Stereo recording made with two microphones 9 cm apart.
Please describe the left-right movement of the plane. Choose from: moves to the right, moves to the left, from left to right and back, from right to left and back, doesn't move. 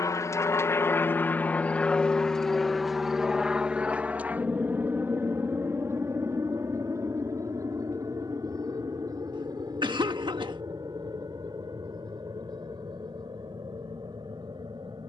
moves to the right.